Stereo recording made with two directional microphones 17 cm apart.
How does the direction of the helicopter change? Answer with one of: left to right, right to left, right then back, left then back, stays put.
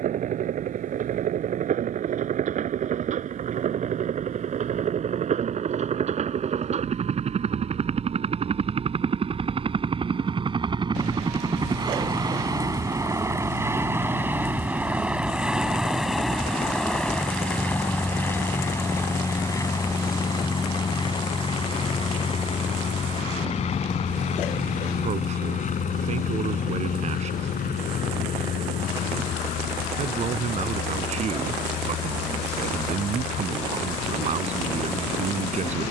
right to left.